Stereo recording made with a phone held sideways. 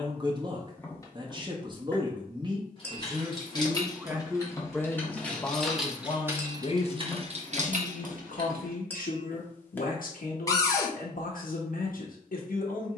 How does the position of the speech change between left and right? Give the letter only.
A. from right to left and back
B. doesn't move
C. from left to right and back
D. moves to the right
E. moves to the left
E.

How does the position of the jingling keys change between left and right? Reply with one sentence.
In this clip you hear the jingling keys move to the right.